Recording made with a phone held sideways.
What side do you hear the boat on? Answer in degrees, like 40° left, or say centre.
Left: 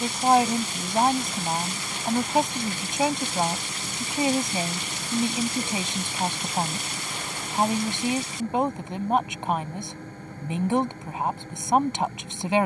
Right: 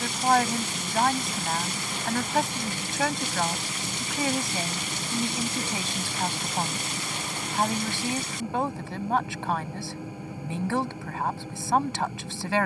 10° right.